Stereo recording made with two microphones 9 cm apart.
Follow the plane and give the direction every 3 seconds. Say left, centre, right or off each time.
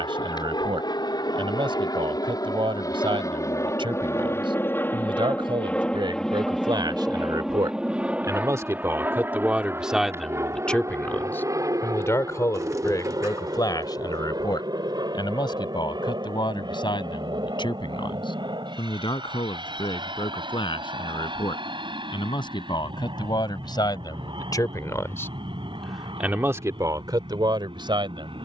left, left, centre, right, right, right, right, right, right, right.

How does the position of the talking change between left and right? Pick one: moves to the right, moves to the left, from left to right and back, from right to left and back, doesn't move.
from right to left and back.